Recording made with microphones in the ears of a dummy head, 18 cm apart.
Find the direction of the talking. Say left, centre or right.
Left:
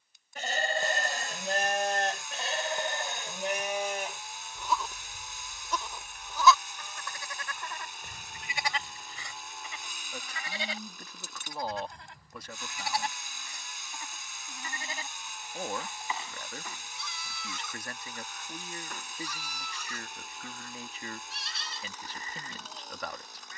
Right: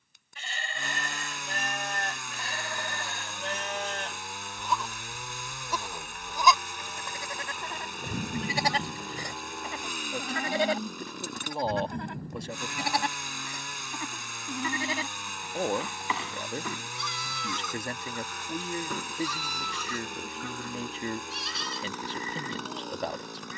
right.